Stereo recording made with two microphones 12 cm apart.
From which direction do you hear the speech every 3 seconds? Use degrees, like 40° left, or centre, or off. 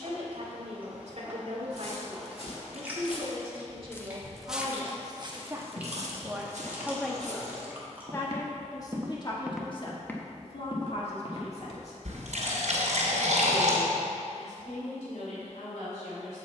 60° right, 40° right, 10° left, 50° left, 70° left, 70° left.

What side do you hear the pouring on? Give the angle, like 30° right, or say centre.
70° right.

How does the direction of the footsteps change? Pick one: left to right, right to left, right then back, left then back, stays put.
right then back.